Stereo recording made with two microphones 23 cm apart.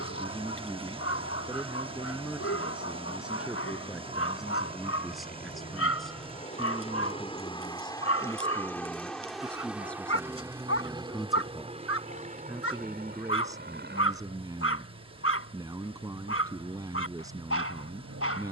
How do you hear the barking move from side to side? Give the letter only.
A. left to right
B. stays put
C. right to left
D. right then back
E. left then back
B.